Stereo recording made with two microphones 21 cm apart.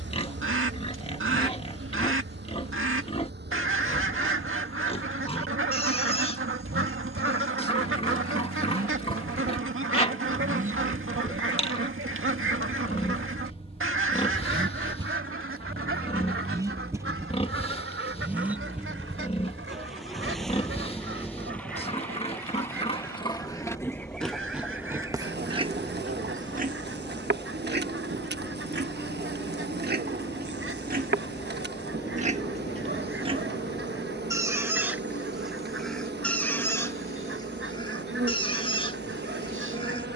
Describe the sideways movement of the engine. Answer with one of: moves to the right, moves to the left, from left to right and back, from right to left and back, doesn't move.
moves to the left.